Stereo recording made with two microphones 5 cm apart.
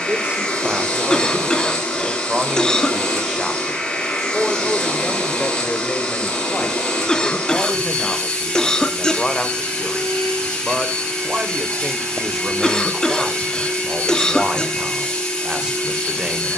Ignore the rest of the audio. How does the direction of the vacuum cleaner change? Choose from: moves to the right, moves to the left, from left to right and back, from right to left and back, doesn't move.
doesn't move.